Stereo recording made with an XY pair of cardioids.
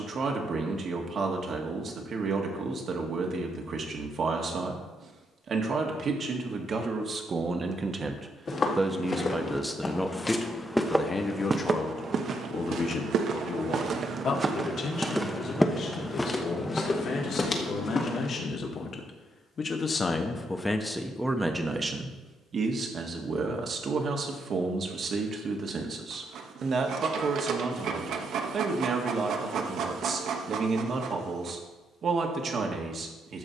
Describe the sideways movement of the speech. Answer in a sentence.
You can hear the speech move from right to left and back again.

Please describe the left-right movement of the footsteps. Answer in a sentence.
In this clip you hear the footsteps move from left to right and back again.